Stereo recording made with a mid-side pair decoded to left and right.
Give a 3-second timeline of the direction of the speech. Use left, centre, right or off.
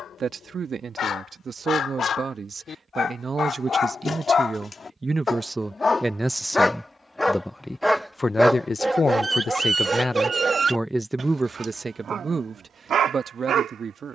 right, right, centre, centre, right.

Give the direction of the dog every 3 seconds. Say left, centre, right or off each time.
left, left, centre, right, right.